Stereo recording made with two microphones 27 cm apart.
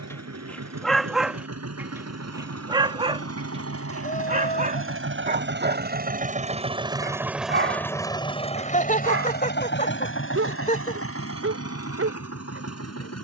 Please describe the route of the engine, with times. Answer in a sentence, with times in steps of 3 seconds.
In this clip you hear the engine on the right from 0 s, in the centre from 6 s and on the left from 9 s.